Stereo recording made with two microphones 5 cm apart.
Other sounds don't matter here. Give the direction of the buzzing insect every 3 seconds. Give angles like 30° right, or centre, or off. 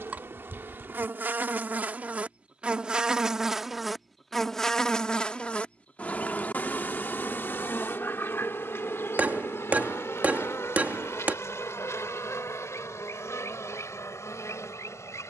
30° right, 10° left, 40° left, 60° left, 70° left.